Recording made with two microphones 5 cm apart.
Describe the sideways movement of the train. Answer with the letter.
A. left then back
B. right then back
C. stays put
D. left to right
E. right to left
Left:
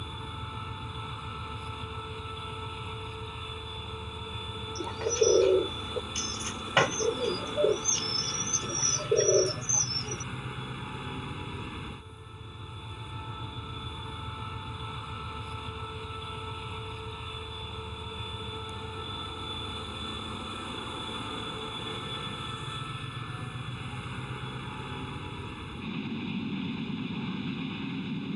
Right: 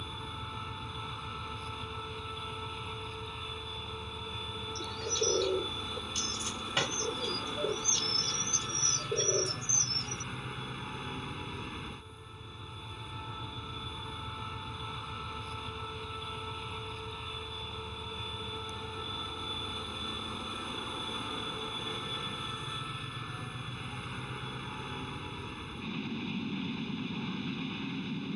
C.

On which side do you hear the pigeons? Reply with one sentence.
In this clip you hear the pigeons on the left.